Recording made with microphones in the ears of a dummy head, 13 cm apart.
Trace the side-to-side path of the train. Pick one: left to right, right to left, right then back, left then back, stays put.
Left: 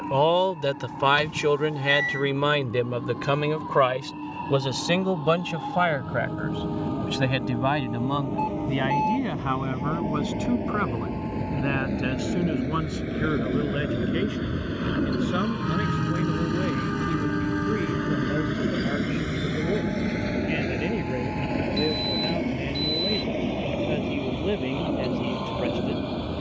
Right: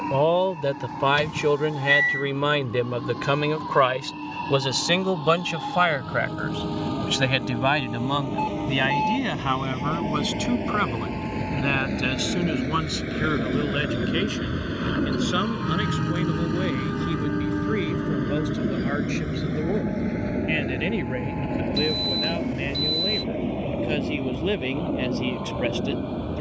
right to left.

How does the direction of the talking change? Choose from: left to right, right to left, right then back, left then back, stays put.
left to right.